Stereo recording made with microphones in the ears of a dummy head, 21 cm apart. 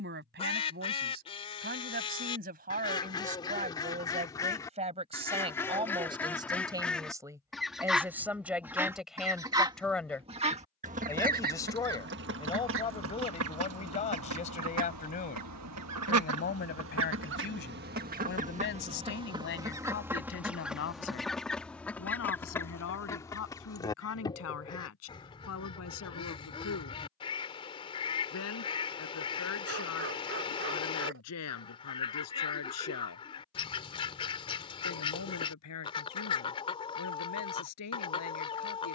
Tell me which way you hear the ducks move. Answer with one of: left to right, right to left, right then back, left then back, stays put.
right then back.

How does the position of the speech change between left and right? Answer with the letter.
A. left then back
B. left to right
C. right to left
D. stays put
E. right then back
C.